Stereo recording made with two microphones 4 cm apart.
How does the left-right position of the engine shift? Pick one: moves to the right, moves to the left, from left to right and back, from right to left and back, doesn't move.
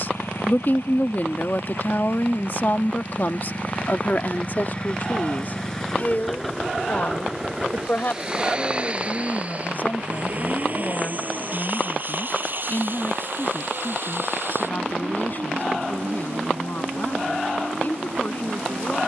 moves to the right.